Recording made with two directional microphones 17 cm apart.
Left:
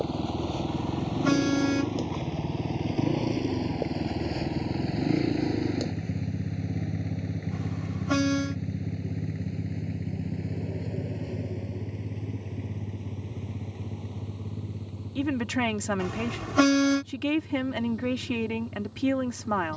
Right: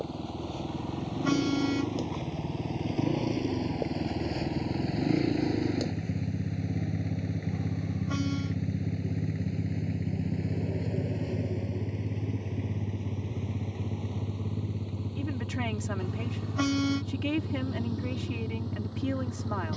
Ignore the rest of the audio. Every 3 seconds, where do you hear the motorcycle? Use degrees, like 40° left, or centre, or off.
50° left, 30° left, centre, 20° right, 40° right, 50° right, 60° right.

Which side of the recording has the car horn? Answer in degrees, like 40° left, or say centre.
60° left.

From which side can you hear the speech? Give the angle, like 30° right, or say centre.
30° left.